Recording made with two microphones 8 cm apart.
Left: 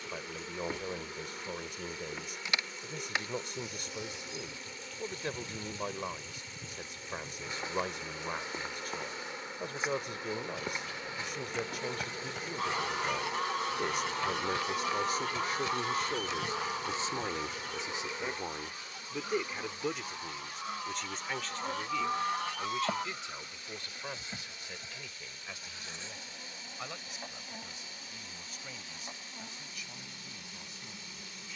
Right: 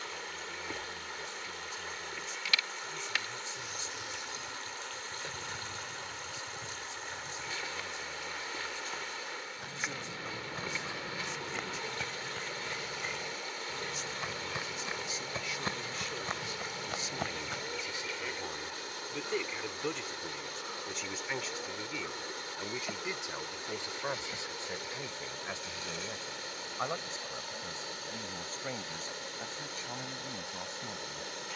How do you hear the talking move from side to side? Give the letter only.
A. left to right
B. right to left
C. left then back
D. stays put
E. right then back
A.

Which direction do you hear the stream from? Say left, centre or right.
right.